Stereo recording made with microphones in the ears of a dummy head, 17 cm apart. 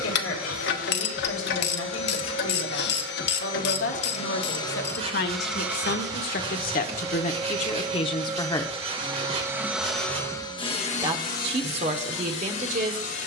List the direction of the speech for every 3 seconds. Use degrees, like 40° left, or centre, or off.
70° left, 60° left, 40° left, 30° right, 40° right.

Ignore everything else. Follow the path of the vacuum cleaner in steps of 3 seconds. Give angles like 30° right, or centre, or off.
70° left, 20° left, 30° right, 20° left, 70° left.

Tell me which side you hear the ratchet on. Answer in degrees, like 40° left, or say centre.
60° left.